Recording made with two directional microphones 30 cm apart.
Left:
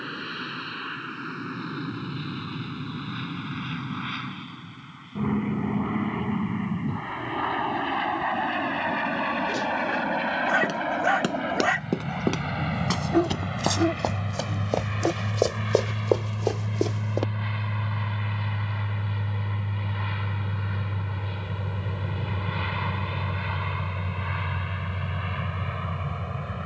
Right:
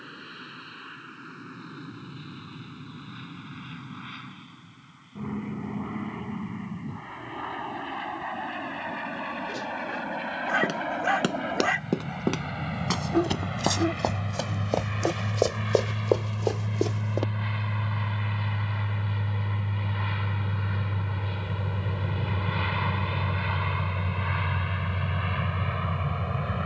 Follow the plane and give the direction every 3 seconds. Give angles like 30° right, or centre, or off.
60° left, 60° left, 50° left, 50° left, 40° left, 20° left, centre, 20° right, 40° right.